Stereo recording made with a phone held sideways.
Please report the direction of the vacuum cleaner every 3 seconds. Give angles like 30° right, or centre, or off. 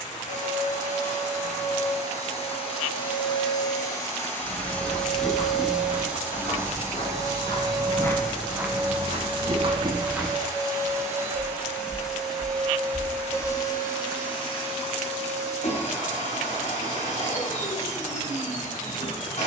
50° left, 10° left, 30° right, 30° right, 20° left, 50° left, 50° left.